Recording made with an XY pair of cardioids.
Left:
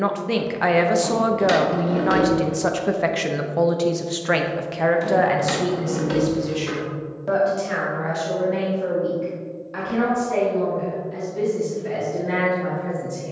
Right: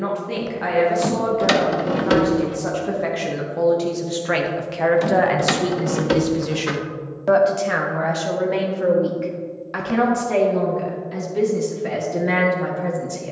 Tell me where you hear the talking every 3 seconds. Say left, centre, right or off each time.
left, centre, right, right, right.